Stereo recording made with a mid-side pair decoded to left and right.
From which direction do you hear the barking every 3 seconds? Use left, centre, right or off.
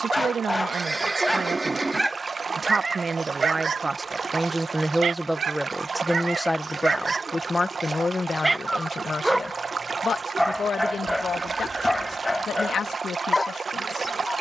centre, right, right, centre, left.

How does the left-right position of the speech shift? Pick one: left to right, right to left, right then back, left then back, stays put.
right to left.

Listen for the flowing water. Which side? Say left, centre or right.
right.